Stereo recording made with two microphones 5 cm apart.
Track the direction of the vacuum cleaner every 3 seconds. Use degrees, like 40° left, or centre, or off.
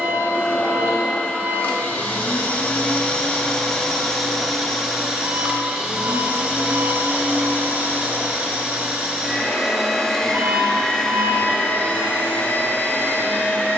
40° left, centre, 30° right, 10° left, 40° left.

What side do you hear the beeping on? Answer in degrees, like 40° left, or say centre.
40° right.